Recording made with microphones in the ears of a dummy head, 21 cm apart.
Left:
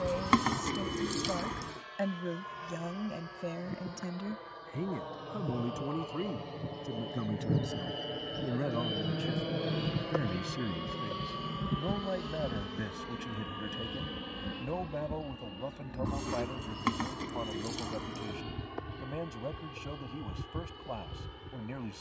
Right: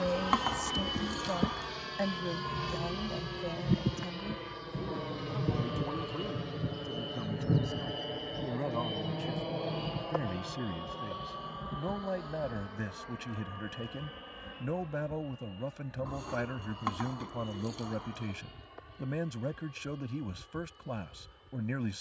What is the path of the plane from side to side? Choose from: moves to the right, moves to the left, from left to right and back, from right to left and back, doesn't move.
moves to the left.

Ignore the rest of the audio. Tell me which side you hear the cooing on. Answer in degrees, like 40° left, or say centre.
40° left.